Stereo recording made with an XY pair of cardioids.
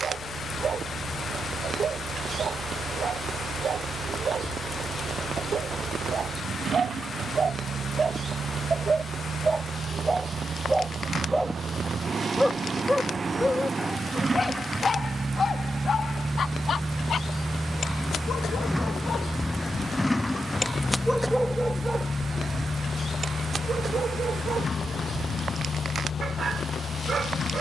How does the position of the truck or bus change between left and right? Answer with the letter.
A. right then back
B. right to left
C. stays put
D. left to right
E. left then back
B.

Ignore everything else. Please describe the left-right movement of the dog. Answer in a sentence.
In this clip you hear the dog go left and come back.